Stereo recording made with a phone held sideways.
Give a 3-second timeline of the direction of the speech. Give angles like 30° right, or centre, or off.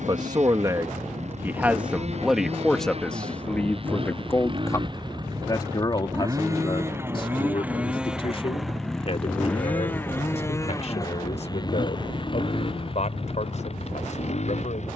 10° right, 20° left, 40° left, 50° left, 50° left.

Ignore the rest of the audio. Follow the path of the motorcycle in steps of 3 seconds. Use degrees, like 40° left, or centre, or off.
50° right, 40° right, 10° right, 20° left, 40° left.